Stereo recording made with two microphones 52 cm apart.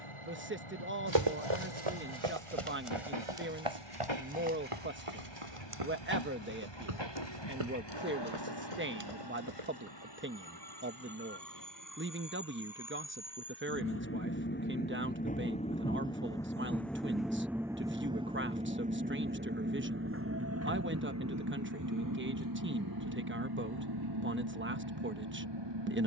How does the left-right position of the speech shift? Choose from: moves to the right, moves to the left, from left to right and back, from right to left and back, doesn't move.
doesn't move.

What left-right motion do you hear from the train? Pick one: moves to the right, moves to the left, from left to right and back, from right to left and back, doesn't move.
moves to the right.